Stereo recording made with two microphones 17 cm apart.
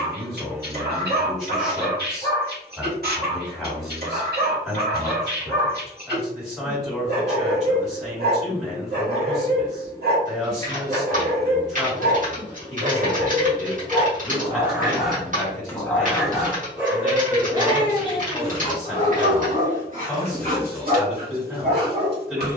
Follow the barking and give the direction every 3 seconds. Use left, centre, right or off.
right, right, right, right, right, centre, right, right.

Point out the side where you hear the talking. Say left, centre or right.
centre.